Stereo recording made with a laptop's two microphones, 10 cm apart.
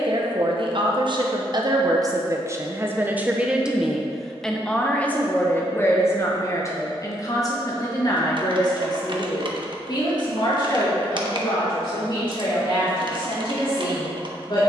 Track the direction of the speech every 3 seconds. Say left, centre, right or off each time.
right, centre, left, left, left.